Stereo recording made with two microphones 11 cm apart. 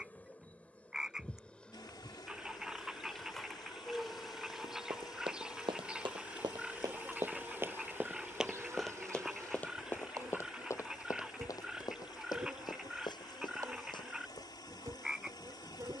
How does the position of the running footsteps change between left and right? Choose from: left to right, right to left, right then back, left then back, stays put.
right to left.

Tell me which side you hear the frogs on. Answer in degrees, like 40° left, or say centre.
10° right.